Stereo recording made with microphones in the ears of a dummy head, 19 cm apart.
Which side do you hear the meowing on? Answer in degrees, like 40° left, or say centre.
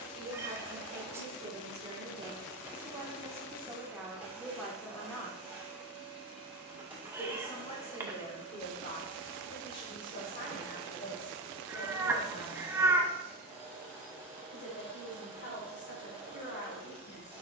10° right.